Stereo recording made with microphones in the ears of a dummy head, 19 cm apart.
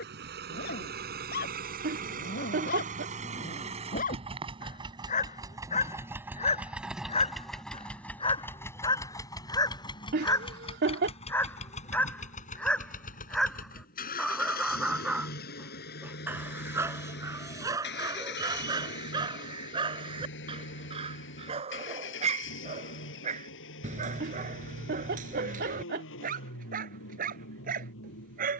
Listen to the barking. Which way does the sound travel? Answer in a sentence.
In this clip you hear the barking go from the left side to the right.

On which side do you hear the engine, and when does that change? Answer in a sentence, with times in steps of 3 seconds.
You can hear the engine on the right from 0 s, in the centre from 6 s and on the left from 9 s.